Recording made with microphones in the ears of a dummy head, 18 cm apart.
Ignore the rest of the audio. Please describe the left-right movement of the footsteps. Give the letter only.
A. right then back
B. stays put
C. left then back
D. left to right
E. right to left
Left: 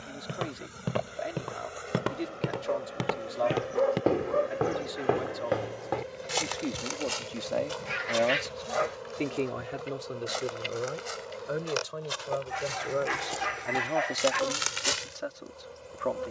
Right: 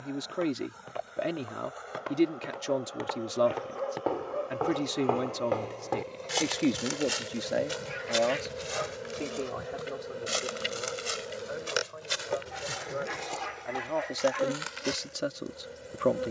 A.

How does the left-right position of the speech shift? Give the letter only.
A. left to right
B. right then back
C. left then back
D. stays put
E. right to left
C.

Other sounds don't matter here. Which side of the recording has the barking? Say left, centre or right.
left.